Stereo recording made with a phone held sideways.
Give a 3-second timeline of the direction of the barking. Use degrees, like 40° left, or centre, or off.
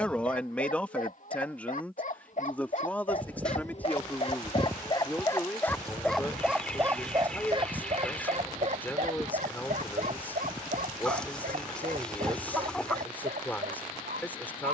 60° left, 40° left, 30° right, 60° right, 80° right.